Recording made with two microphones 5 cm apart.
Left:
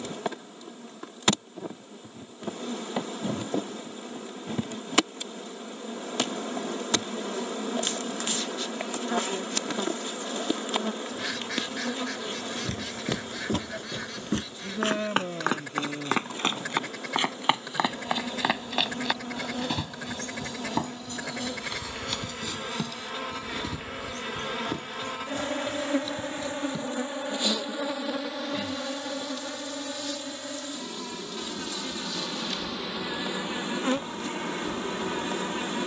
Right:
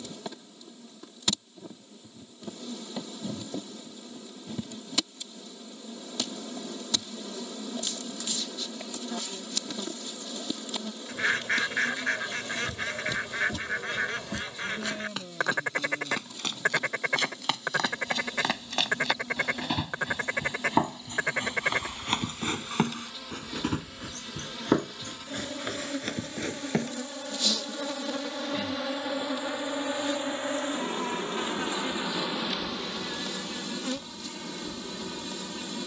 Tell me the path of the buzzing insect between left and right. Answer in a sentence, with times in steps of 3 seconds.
In this clip you hear the buzzing insect on the left from 0 s, in the centre from 27 s, on the right from 30 s and on the left from 33 s.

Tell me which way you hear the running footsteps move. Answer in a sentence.
You can hear the running footsteps go from the left side to the right.